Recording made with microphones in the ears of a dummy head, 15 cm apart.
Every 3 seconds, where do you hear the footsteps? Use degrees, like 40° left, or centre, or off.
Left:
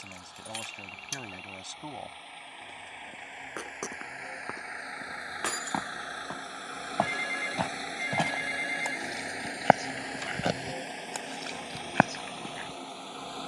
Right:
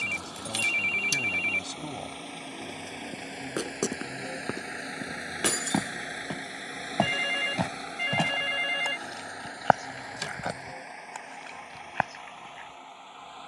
off, 40° right, 10° right, 30° left, 60° left.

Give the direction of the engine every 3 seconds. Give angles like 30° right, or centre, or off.
60° right, 40° right, centre, 30° left, 50° left.